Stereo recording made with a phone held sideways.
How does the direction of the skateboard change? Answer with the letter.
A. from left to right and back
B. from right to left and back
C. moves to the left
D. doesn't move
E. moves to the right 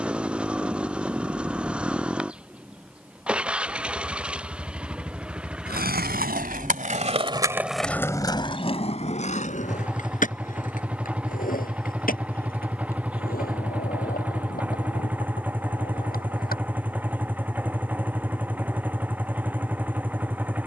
C.